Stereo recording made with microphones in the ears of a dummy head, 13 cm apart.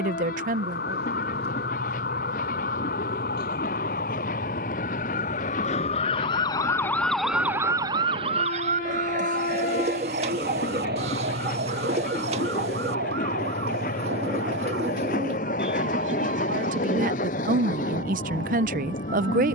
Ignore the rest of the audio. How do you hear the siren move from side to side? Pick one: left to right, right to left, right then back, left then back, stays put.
left to right.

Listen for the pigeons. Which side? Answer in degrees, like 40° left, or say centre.
50° right.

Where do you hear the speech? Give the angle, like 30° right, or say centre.
60° right.